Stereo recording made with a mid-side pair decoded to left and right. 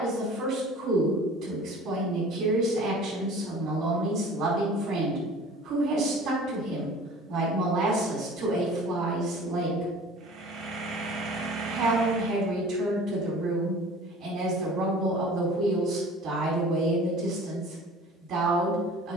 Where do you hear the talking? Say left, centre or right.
right.